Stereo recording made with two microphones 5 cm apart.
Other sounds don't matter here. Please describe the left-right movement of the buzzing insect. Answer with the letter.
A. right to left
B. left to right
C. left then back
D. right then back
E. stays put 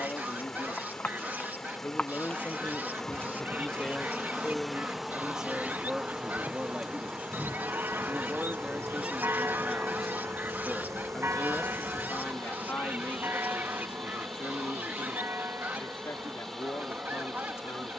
B.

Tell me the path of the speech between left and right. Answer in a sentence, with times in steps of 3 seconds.
You can hear the speech on the left from 0 s, in the centre from 3 s, on the right from 6 s, in the centre from 9 s and on the left from 12 s.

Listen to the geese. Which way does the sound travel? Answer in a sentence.
In this clip you hear the geese stay in one place.